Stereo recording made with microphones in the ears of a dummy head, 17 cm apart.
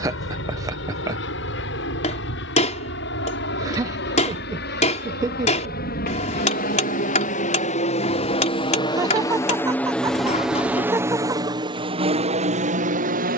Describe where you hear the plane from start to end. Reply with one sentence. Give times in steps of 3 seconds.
In this clip you hear the plane on the left from 0 s, in the centre from 9 s and on the right from 12 s.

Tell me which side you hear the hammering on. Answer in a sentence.
You can hear the hammering on the left.